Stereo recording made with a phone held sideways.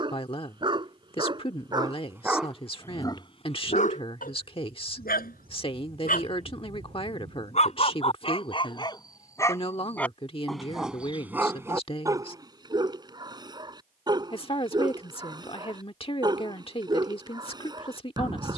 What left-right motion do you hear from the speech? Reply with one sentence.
You can hear the speech stay in one place.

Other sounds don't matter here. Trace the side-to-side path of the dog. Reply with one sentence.
In this clip you hear the dog move from right to left and back again.